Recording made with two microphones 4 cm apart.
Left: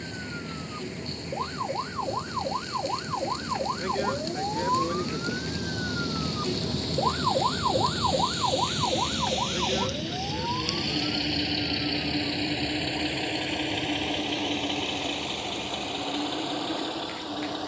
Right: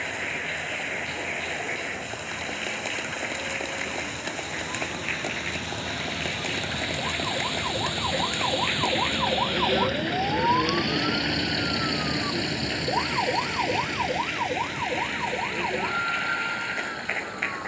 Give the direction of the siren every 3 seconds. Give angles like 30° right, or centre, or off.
70° left, 50° left, 20° left, 30° right, 60° right, 70° right.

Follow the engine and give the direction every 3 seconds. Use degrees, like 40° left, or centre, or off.
60° right, 50° right, 40° right, 10° right, 40° left, 70° left.